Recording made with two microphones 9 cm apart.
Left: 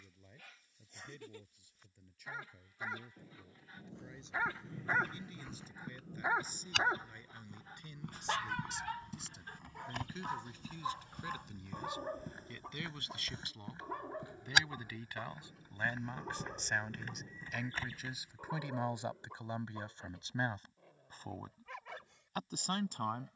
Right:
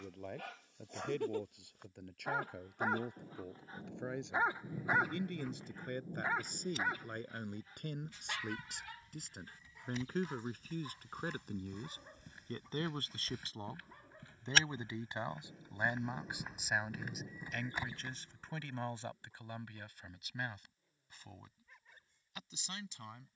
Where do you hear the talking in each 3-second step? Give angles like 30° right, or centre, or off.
60° right, 60° right, 50° right, 50° right, 30° right, 10° right, 20° left, 40° left.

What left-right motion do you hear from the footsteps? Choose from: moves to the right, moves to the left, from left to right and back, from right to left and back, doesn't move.
moves to the right.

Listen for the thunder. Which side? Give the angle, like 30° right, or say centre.
20° right.